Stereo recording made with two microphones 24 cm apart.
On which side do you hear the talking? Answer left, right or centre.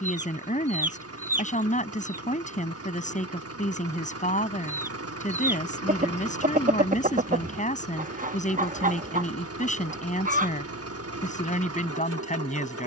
left.